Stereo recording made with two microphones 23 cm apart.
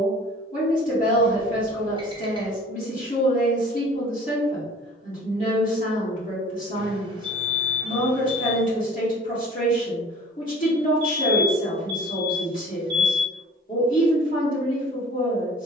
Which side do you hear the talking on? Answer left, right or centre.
left.